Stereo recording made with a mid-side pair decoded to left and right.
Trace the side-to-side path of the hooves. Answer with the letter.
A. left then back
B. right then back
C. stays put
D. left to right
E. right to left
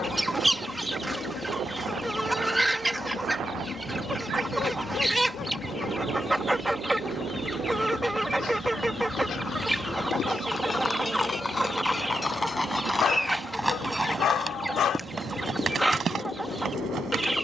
D.